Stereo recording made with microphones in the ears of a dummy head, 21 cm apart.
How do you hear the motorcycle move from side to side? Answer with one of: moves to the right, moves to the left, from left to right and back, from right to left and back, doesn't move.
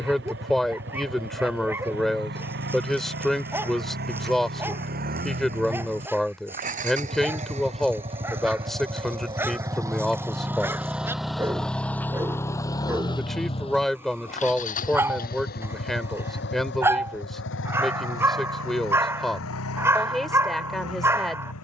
moves to the left.